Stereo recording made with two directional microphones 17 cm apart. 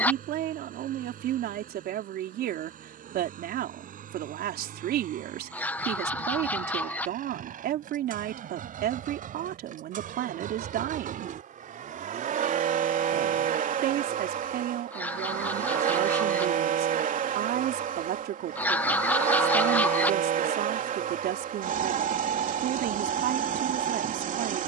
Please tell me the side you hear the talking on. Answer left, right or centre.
right.